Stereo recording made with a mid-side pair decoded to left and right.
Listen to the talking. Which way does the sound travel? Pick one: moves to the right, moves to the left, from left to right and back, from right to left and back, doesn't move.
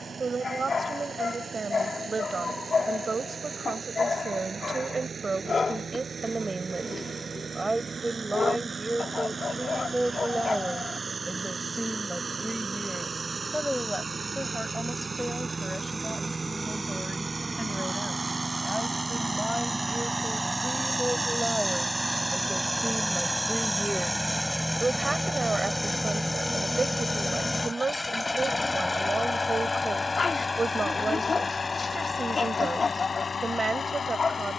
from right to left and back.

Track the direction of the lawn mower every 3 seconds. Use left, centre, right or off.
right, right, right, right, right, right, right, centre, centre, left, left, left.